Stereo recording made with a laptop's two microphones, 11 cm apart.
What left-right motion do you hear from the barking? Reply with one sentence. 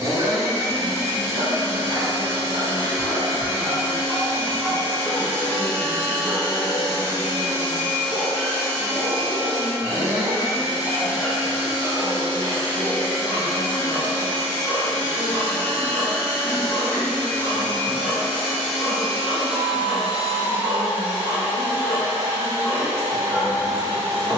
You can hear the barking go from the right side to the left.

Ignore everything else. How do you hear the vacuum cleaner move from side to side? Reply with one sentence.
You can hear the vacuum cleaner go left and come back.